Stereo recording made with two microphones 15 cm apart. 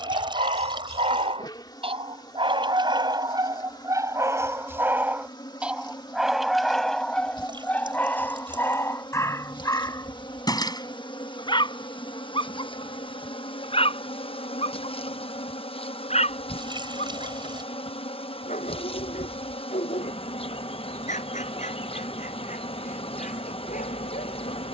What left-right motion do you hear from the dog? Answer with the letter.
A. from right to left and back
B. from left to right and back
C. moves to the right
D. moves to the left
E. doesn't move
D.